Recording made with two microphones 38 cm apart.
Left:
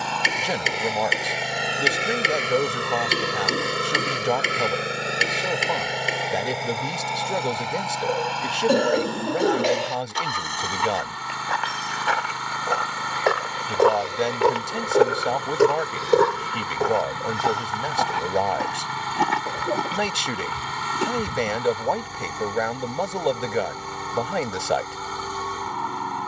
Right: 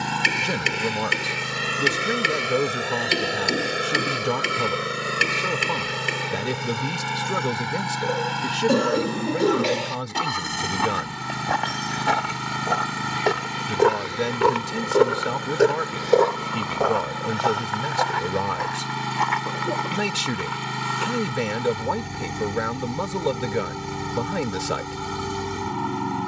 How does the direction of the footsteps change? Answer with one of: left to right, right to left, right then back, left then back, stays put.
right to left.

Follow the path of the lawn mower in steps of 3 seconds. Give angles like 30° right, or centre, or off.
20° right, centre, 30° right, 40° right, 50° right, 50° right, 50° right, 50° right, 50° right.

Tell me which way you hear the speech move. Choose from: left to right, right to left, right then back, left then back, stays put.
stays put.